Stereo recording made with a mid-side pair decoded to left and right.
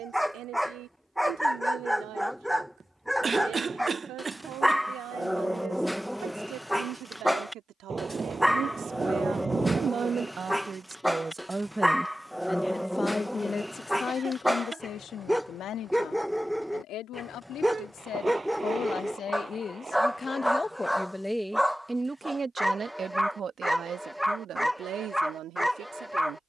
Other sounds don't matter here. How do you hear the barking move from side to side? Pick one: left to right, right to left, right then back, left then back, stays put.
stays put.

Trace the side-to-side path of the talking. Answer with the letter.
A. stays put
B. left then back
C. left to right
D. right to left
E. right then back
B.